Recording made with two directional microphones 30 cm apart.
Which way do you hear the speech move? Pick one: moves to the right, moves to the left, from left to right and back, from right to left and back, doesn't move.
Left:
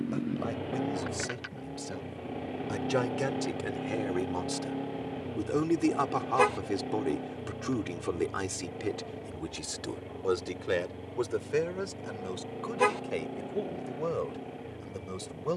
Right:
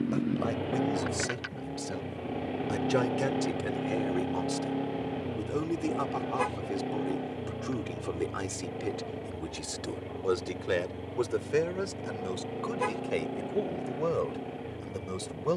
from right to left and back.